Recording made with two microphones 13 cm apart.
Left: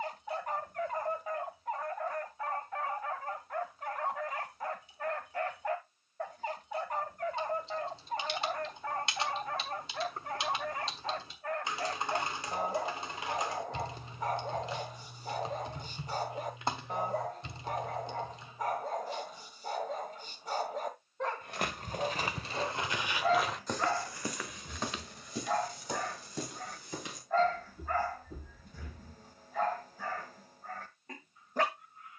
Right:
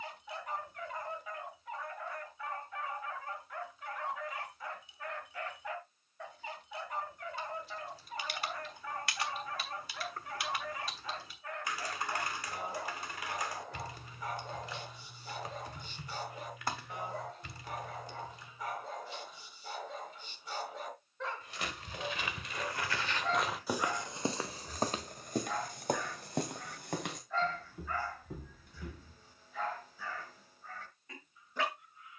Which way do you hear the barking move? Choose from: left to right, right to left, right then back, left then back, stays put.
stays put.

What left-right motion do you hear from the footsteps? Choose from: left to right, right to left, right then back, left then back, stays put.
left to right.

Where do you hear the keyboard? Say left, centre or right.
left.